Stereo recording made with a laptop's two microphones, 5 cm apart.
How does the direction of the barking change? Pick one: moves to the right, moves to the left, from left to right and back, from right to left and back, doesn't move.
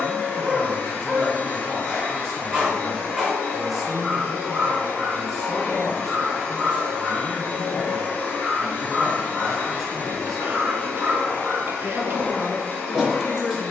doesn't move.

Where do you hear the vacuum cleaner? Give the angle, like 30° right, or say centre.
30° left.